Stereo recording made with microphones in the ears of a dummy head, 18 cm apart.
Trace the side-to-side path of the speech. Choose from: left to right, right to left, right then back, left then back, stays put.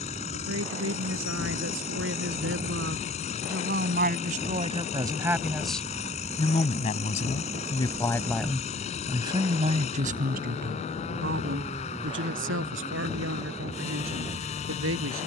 left then back.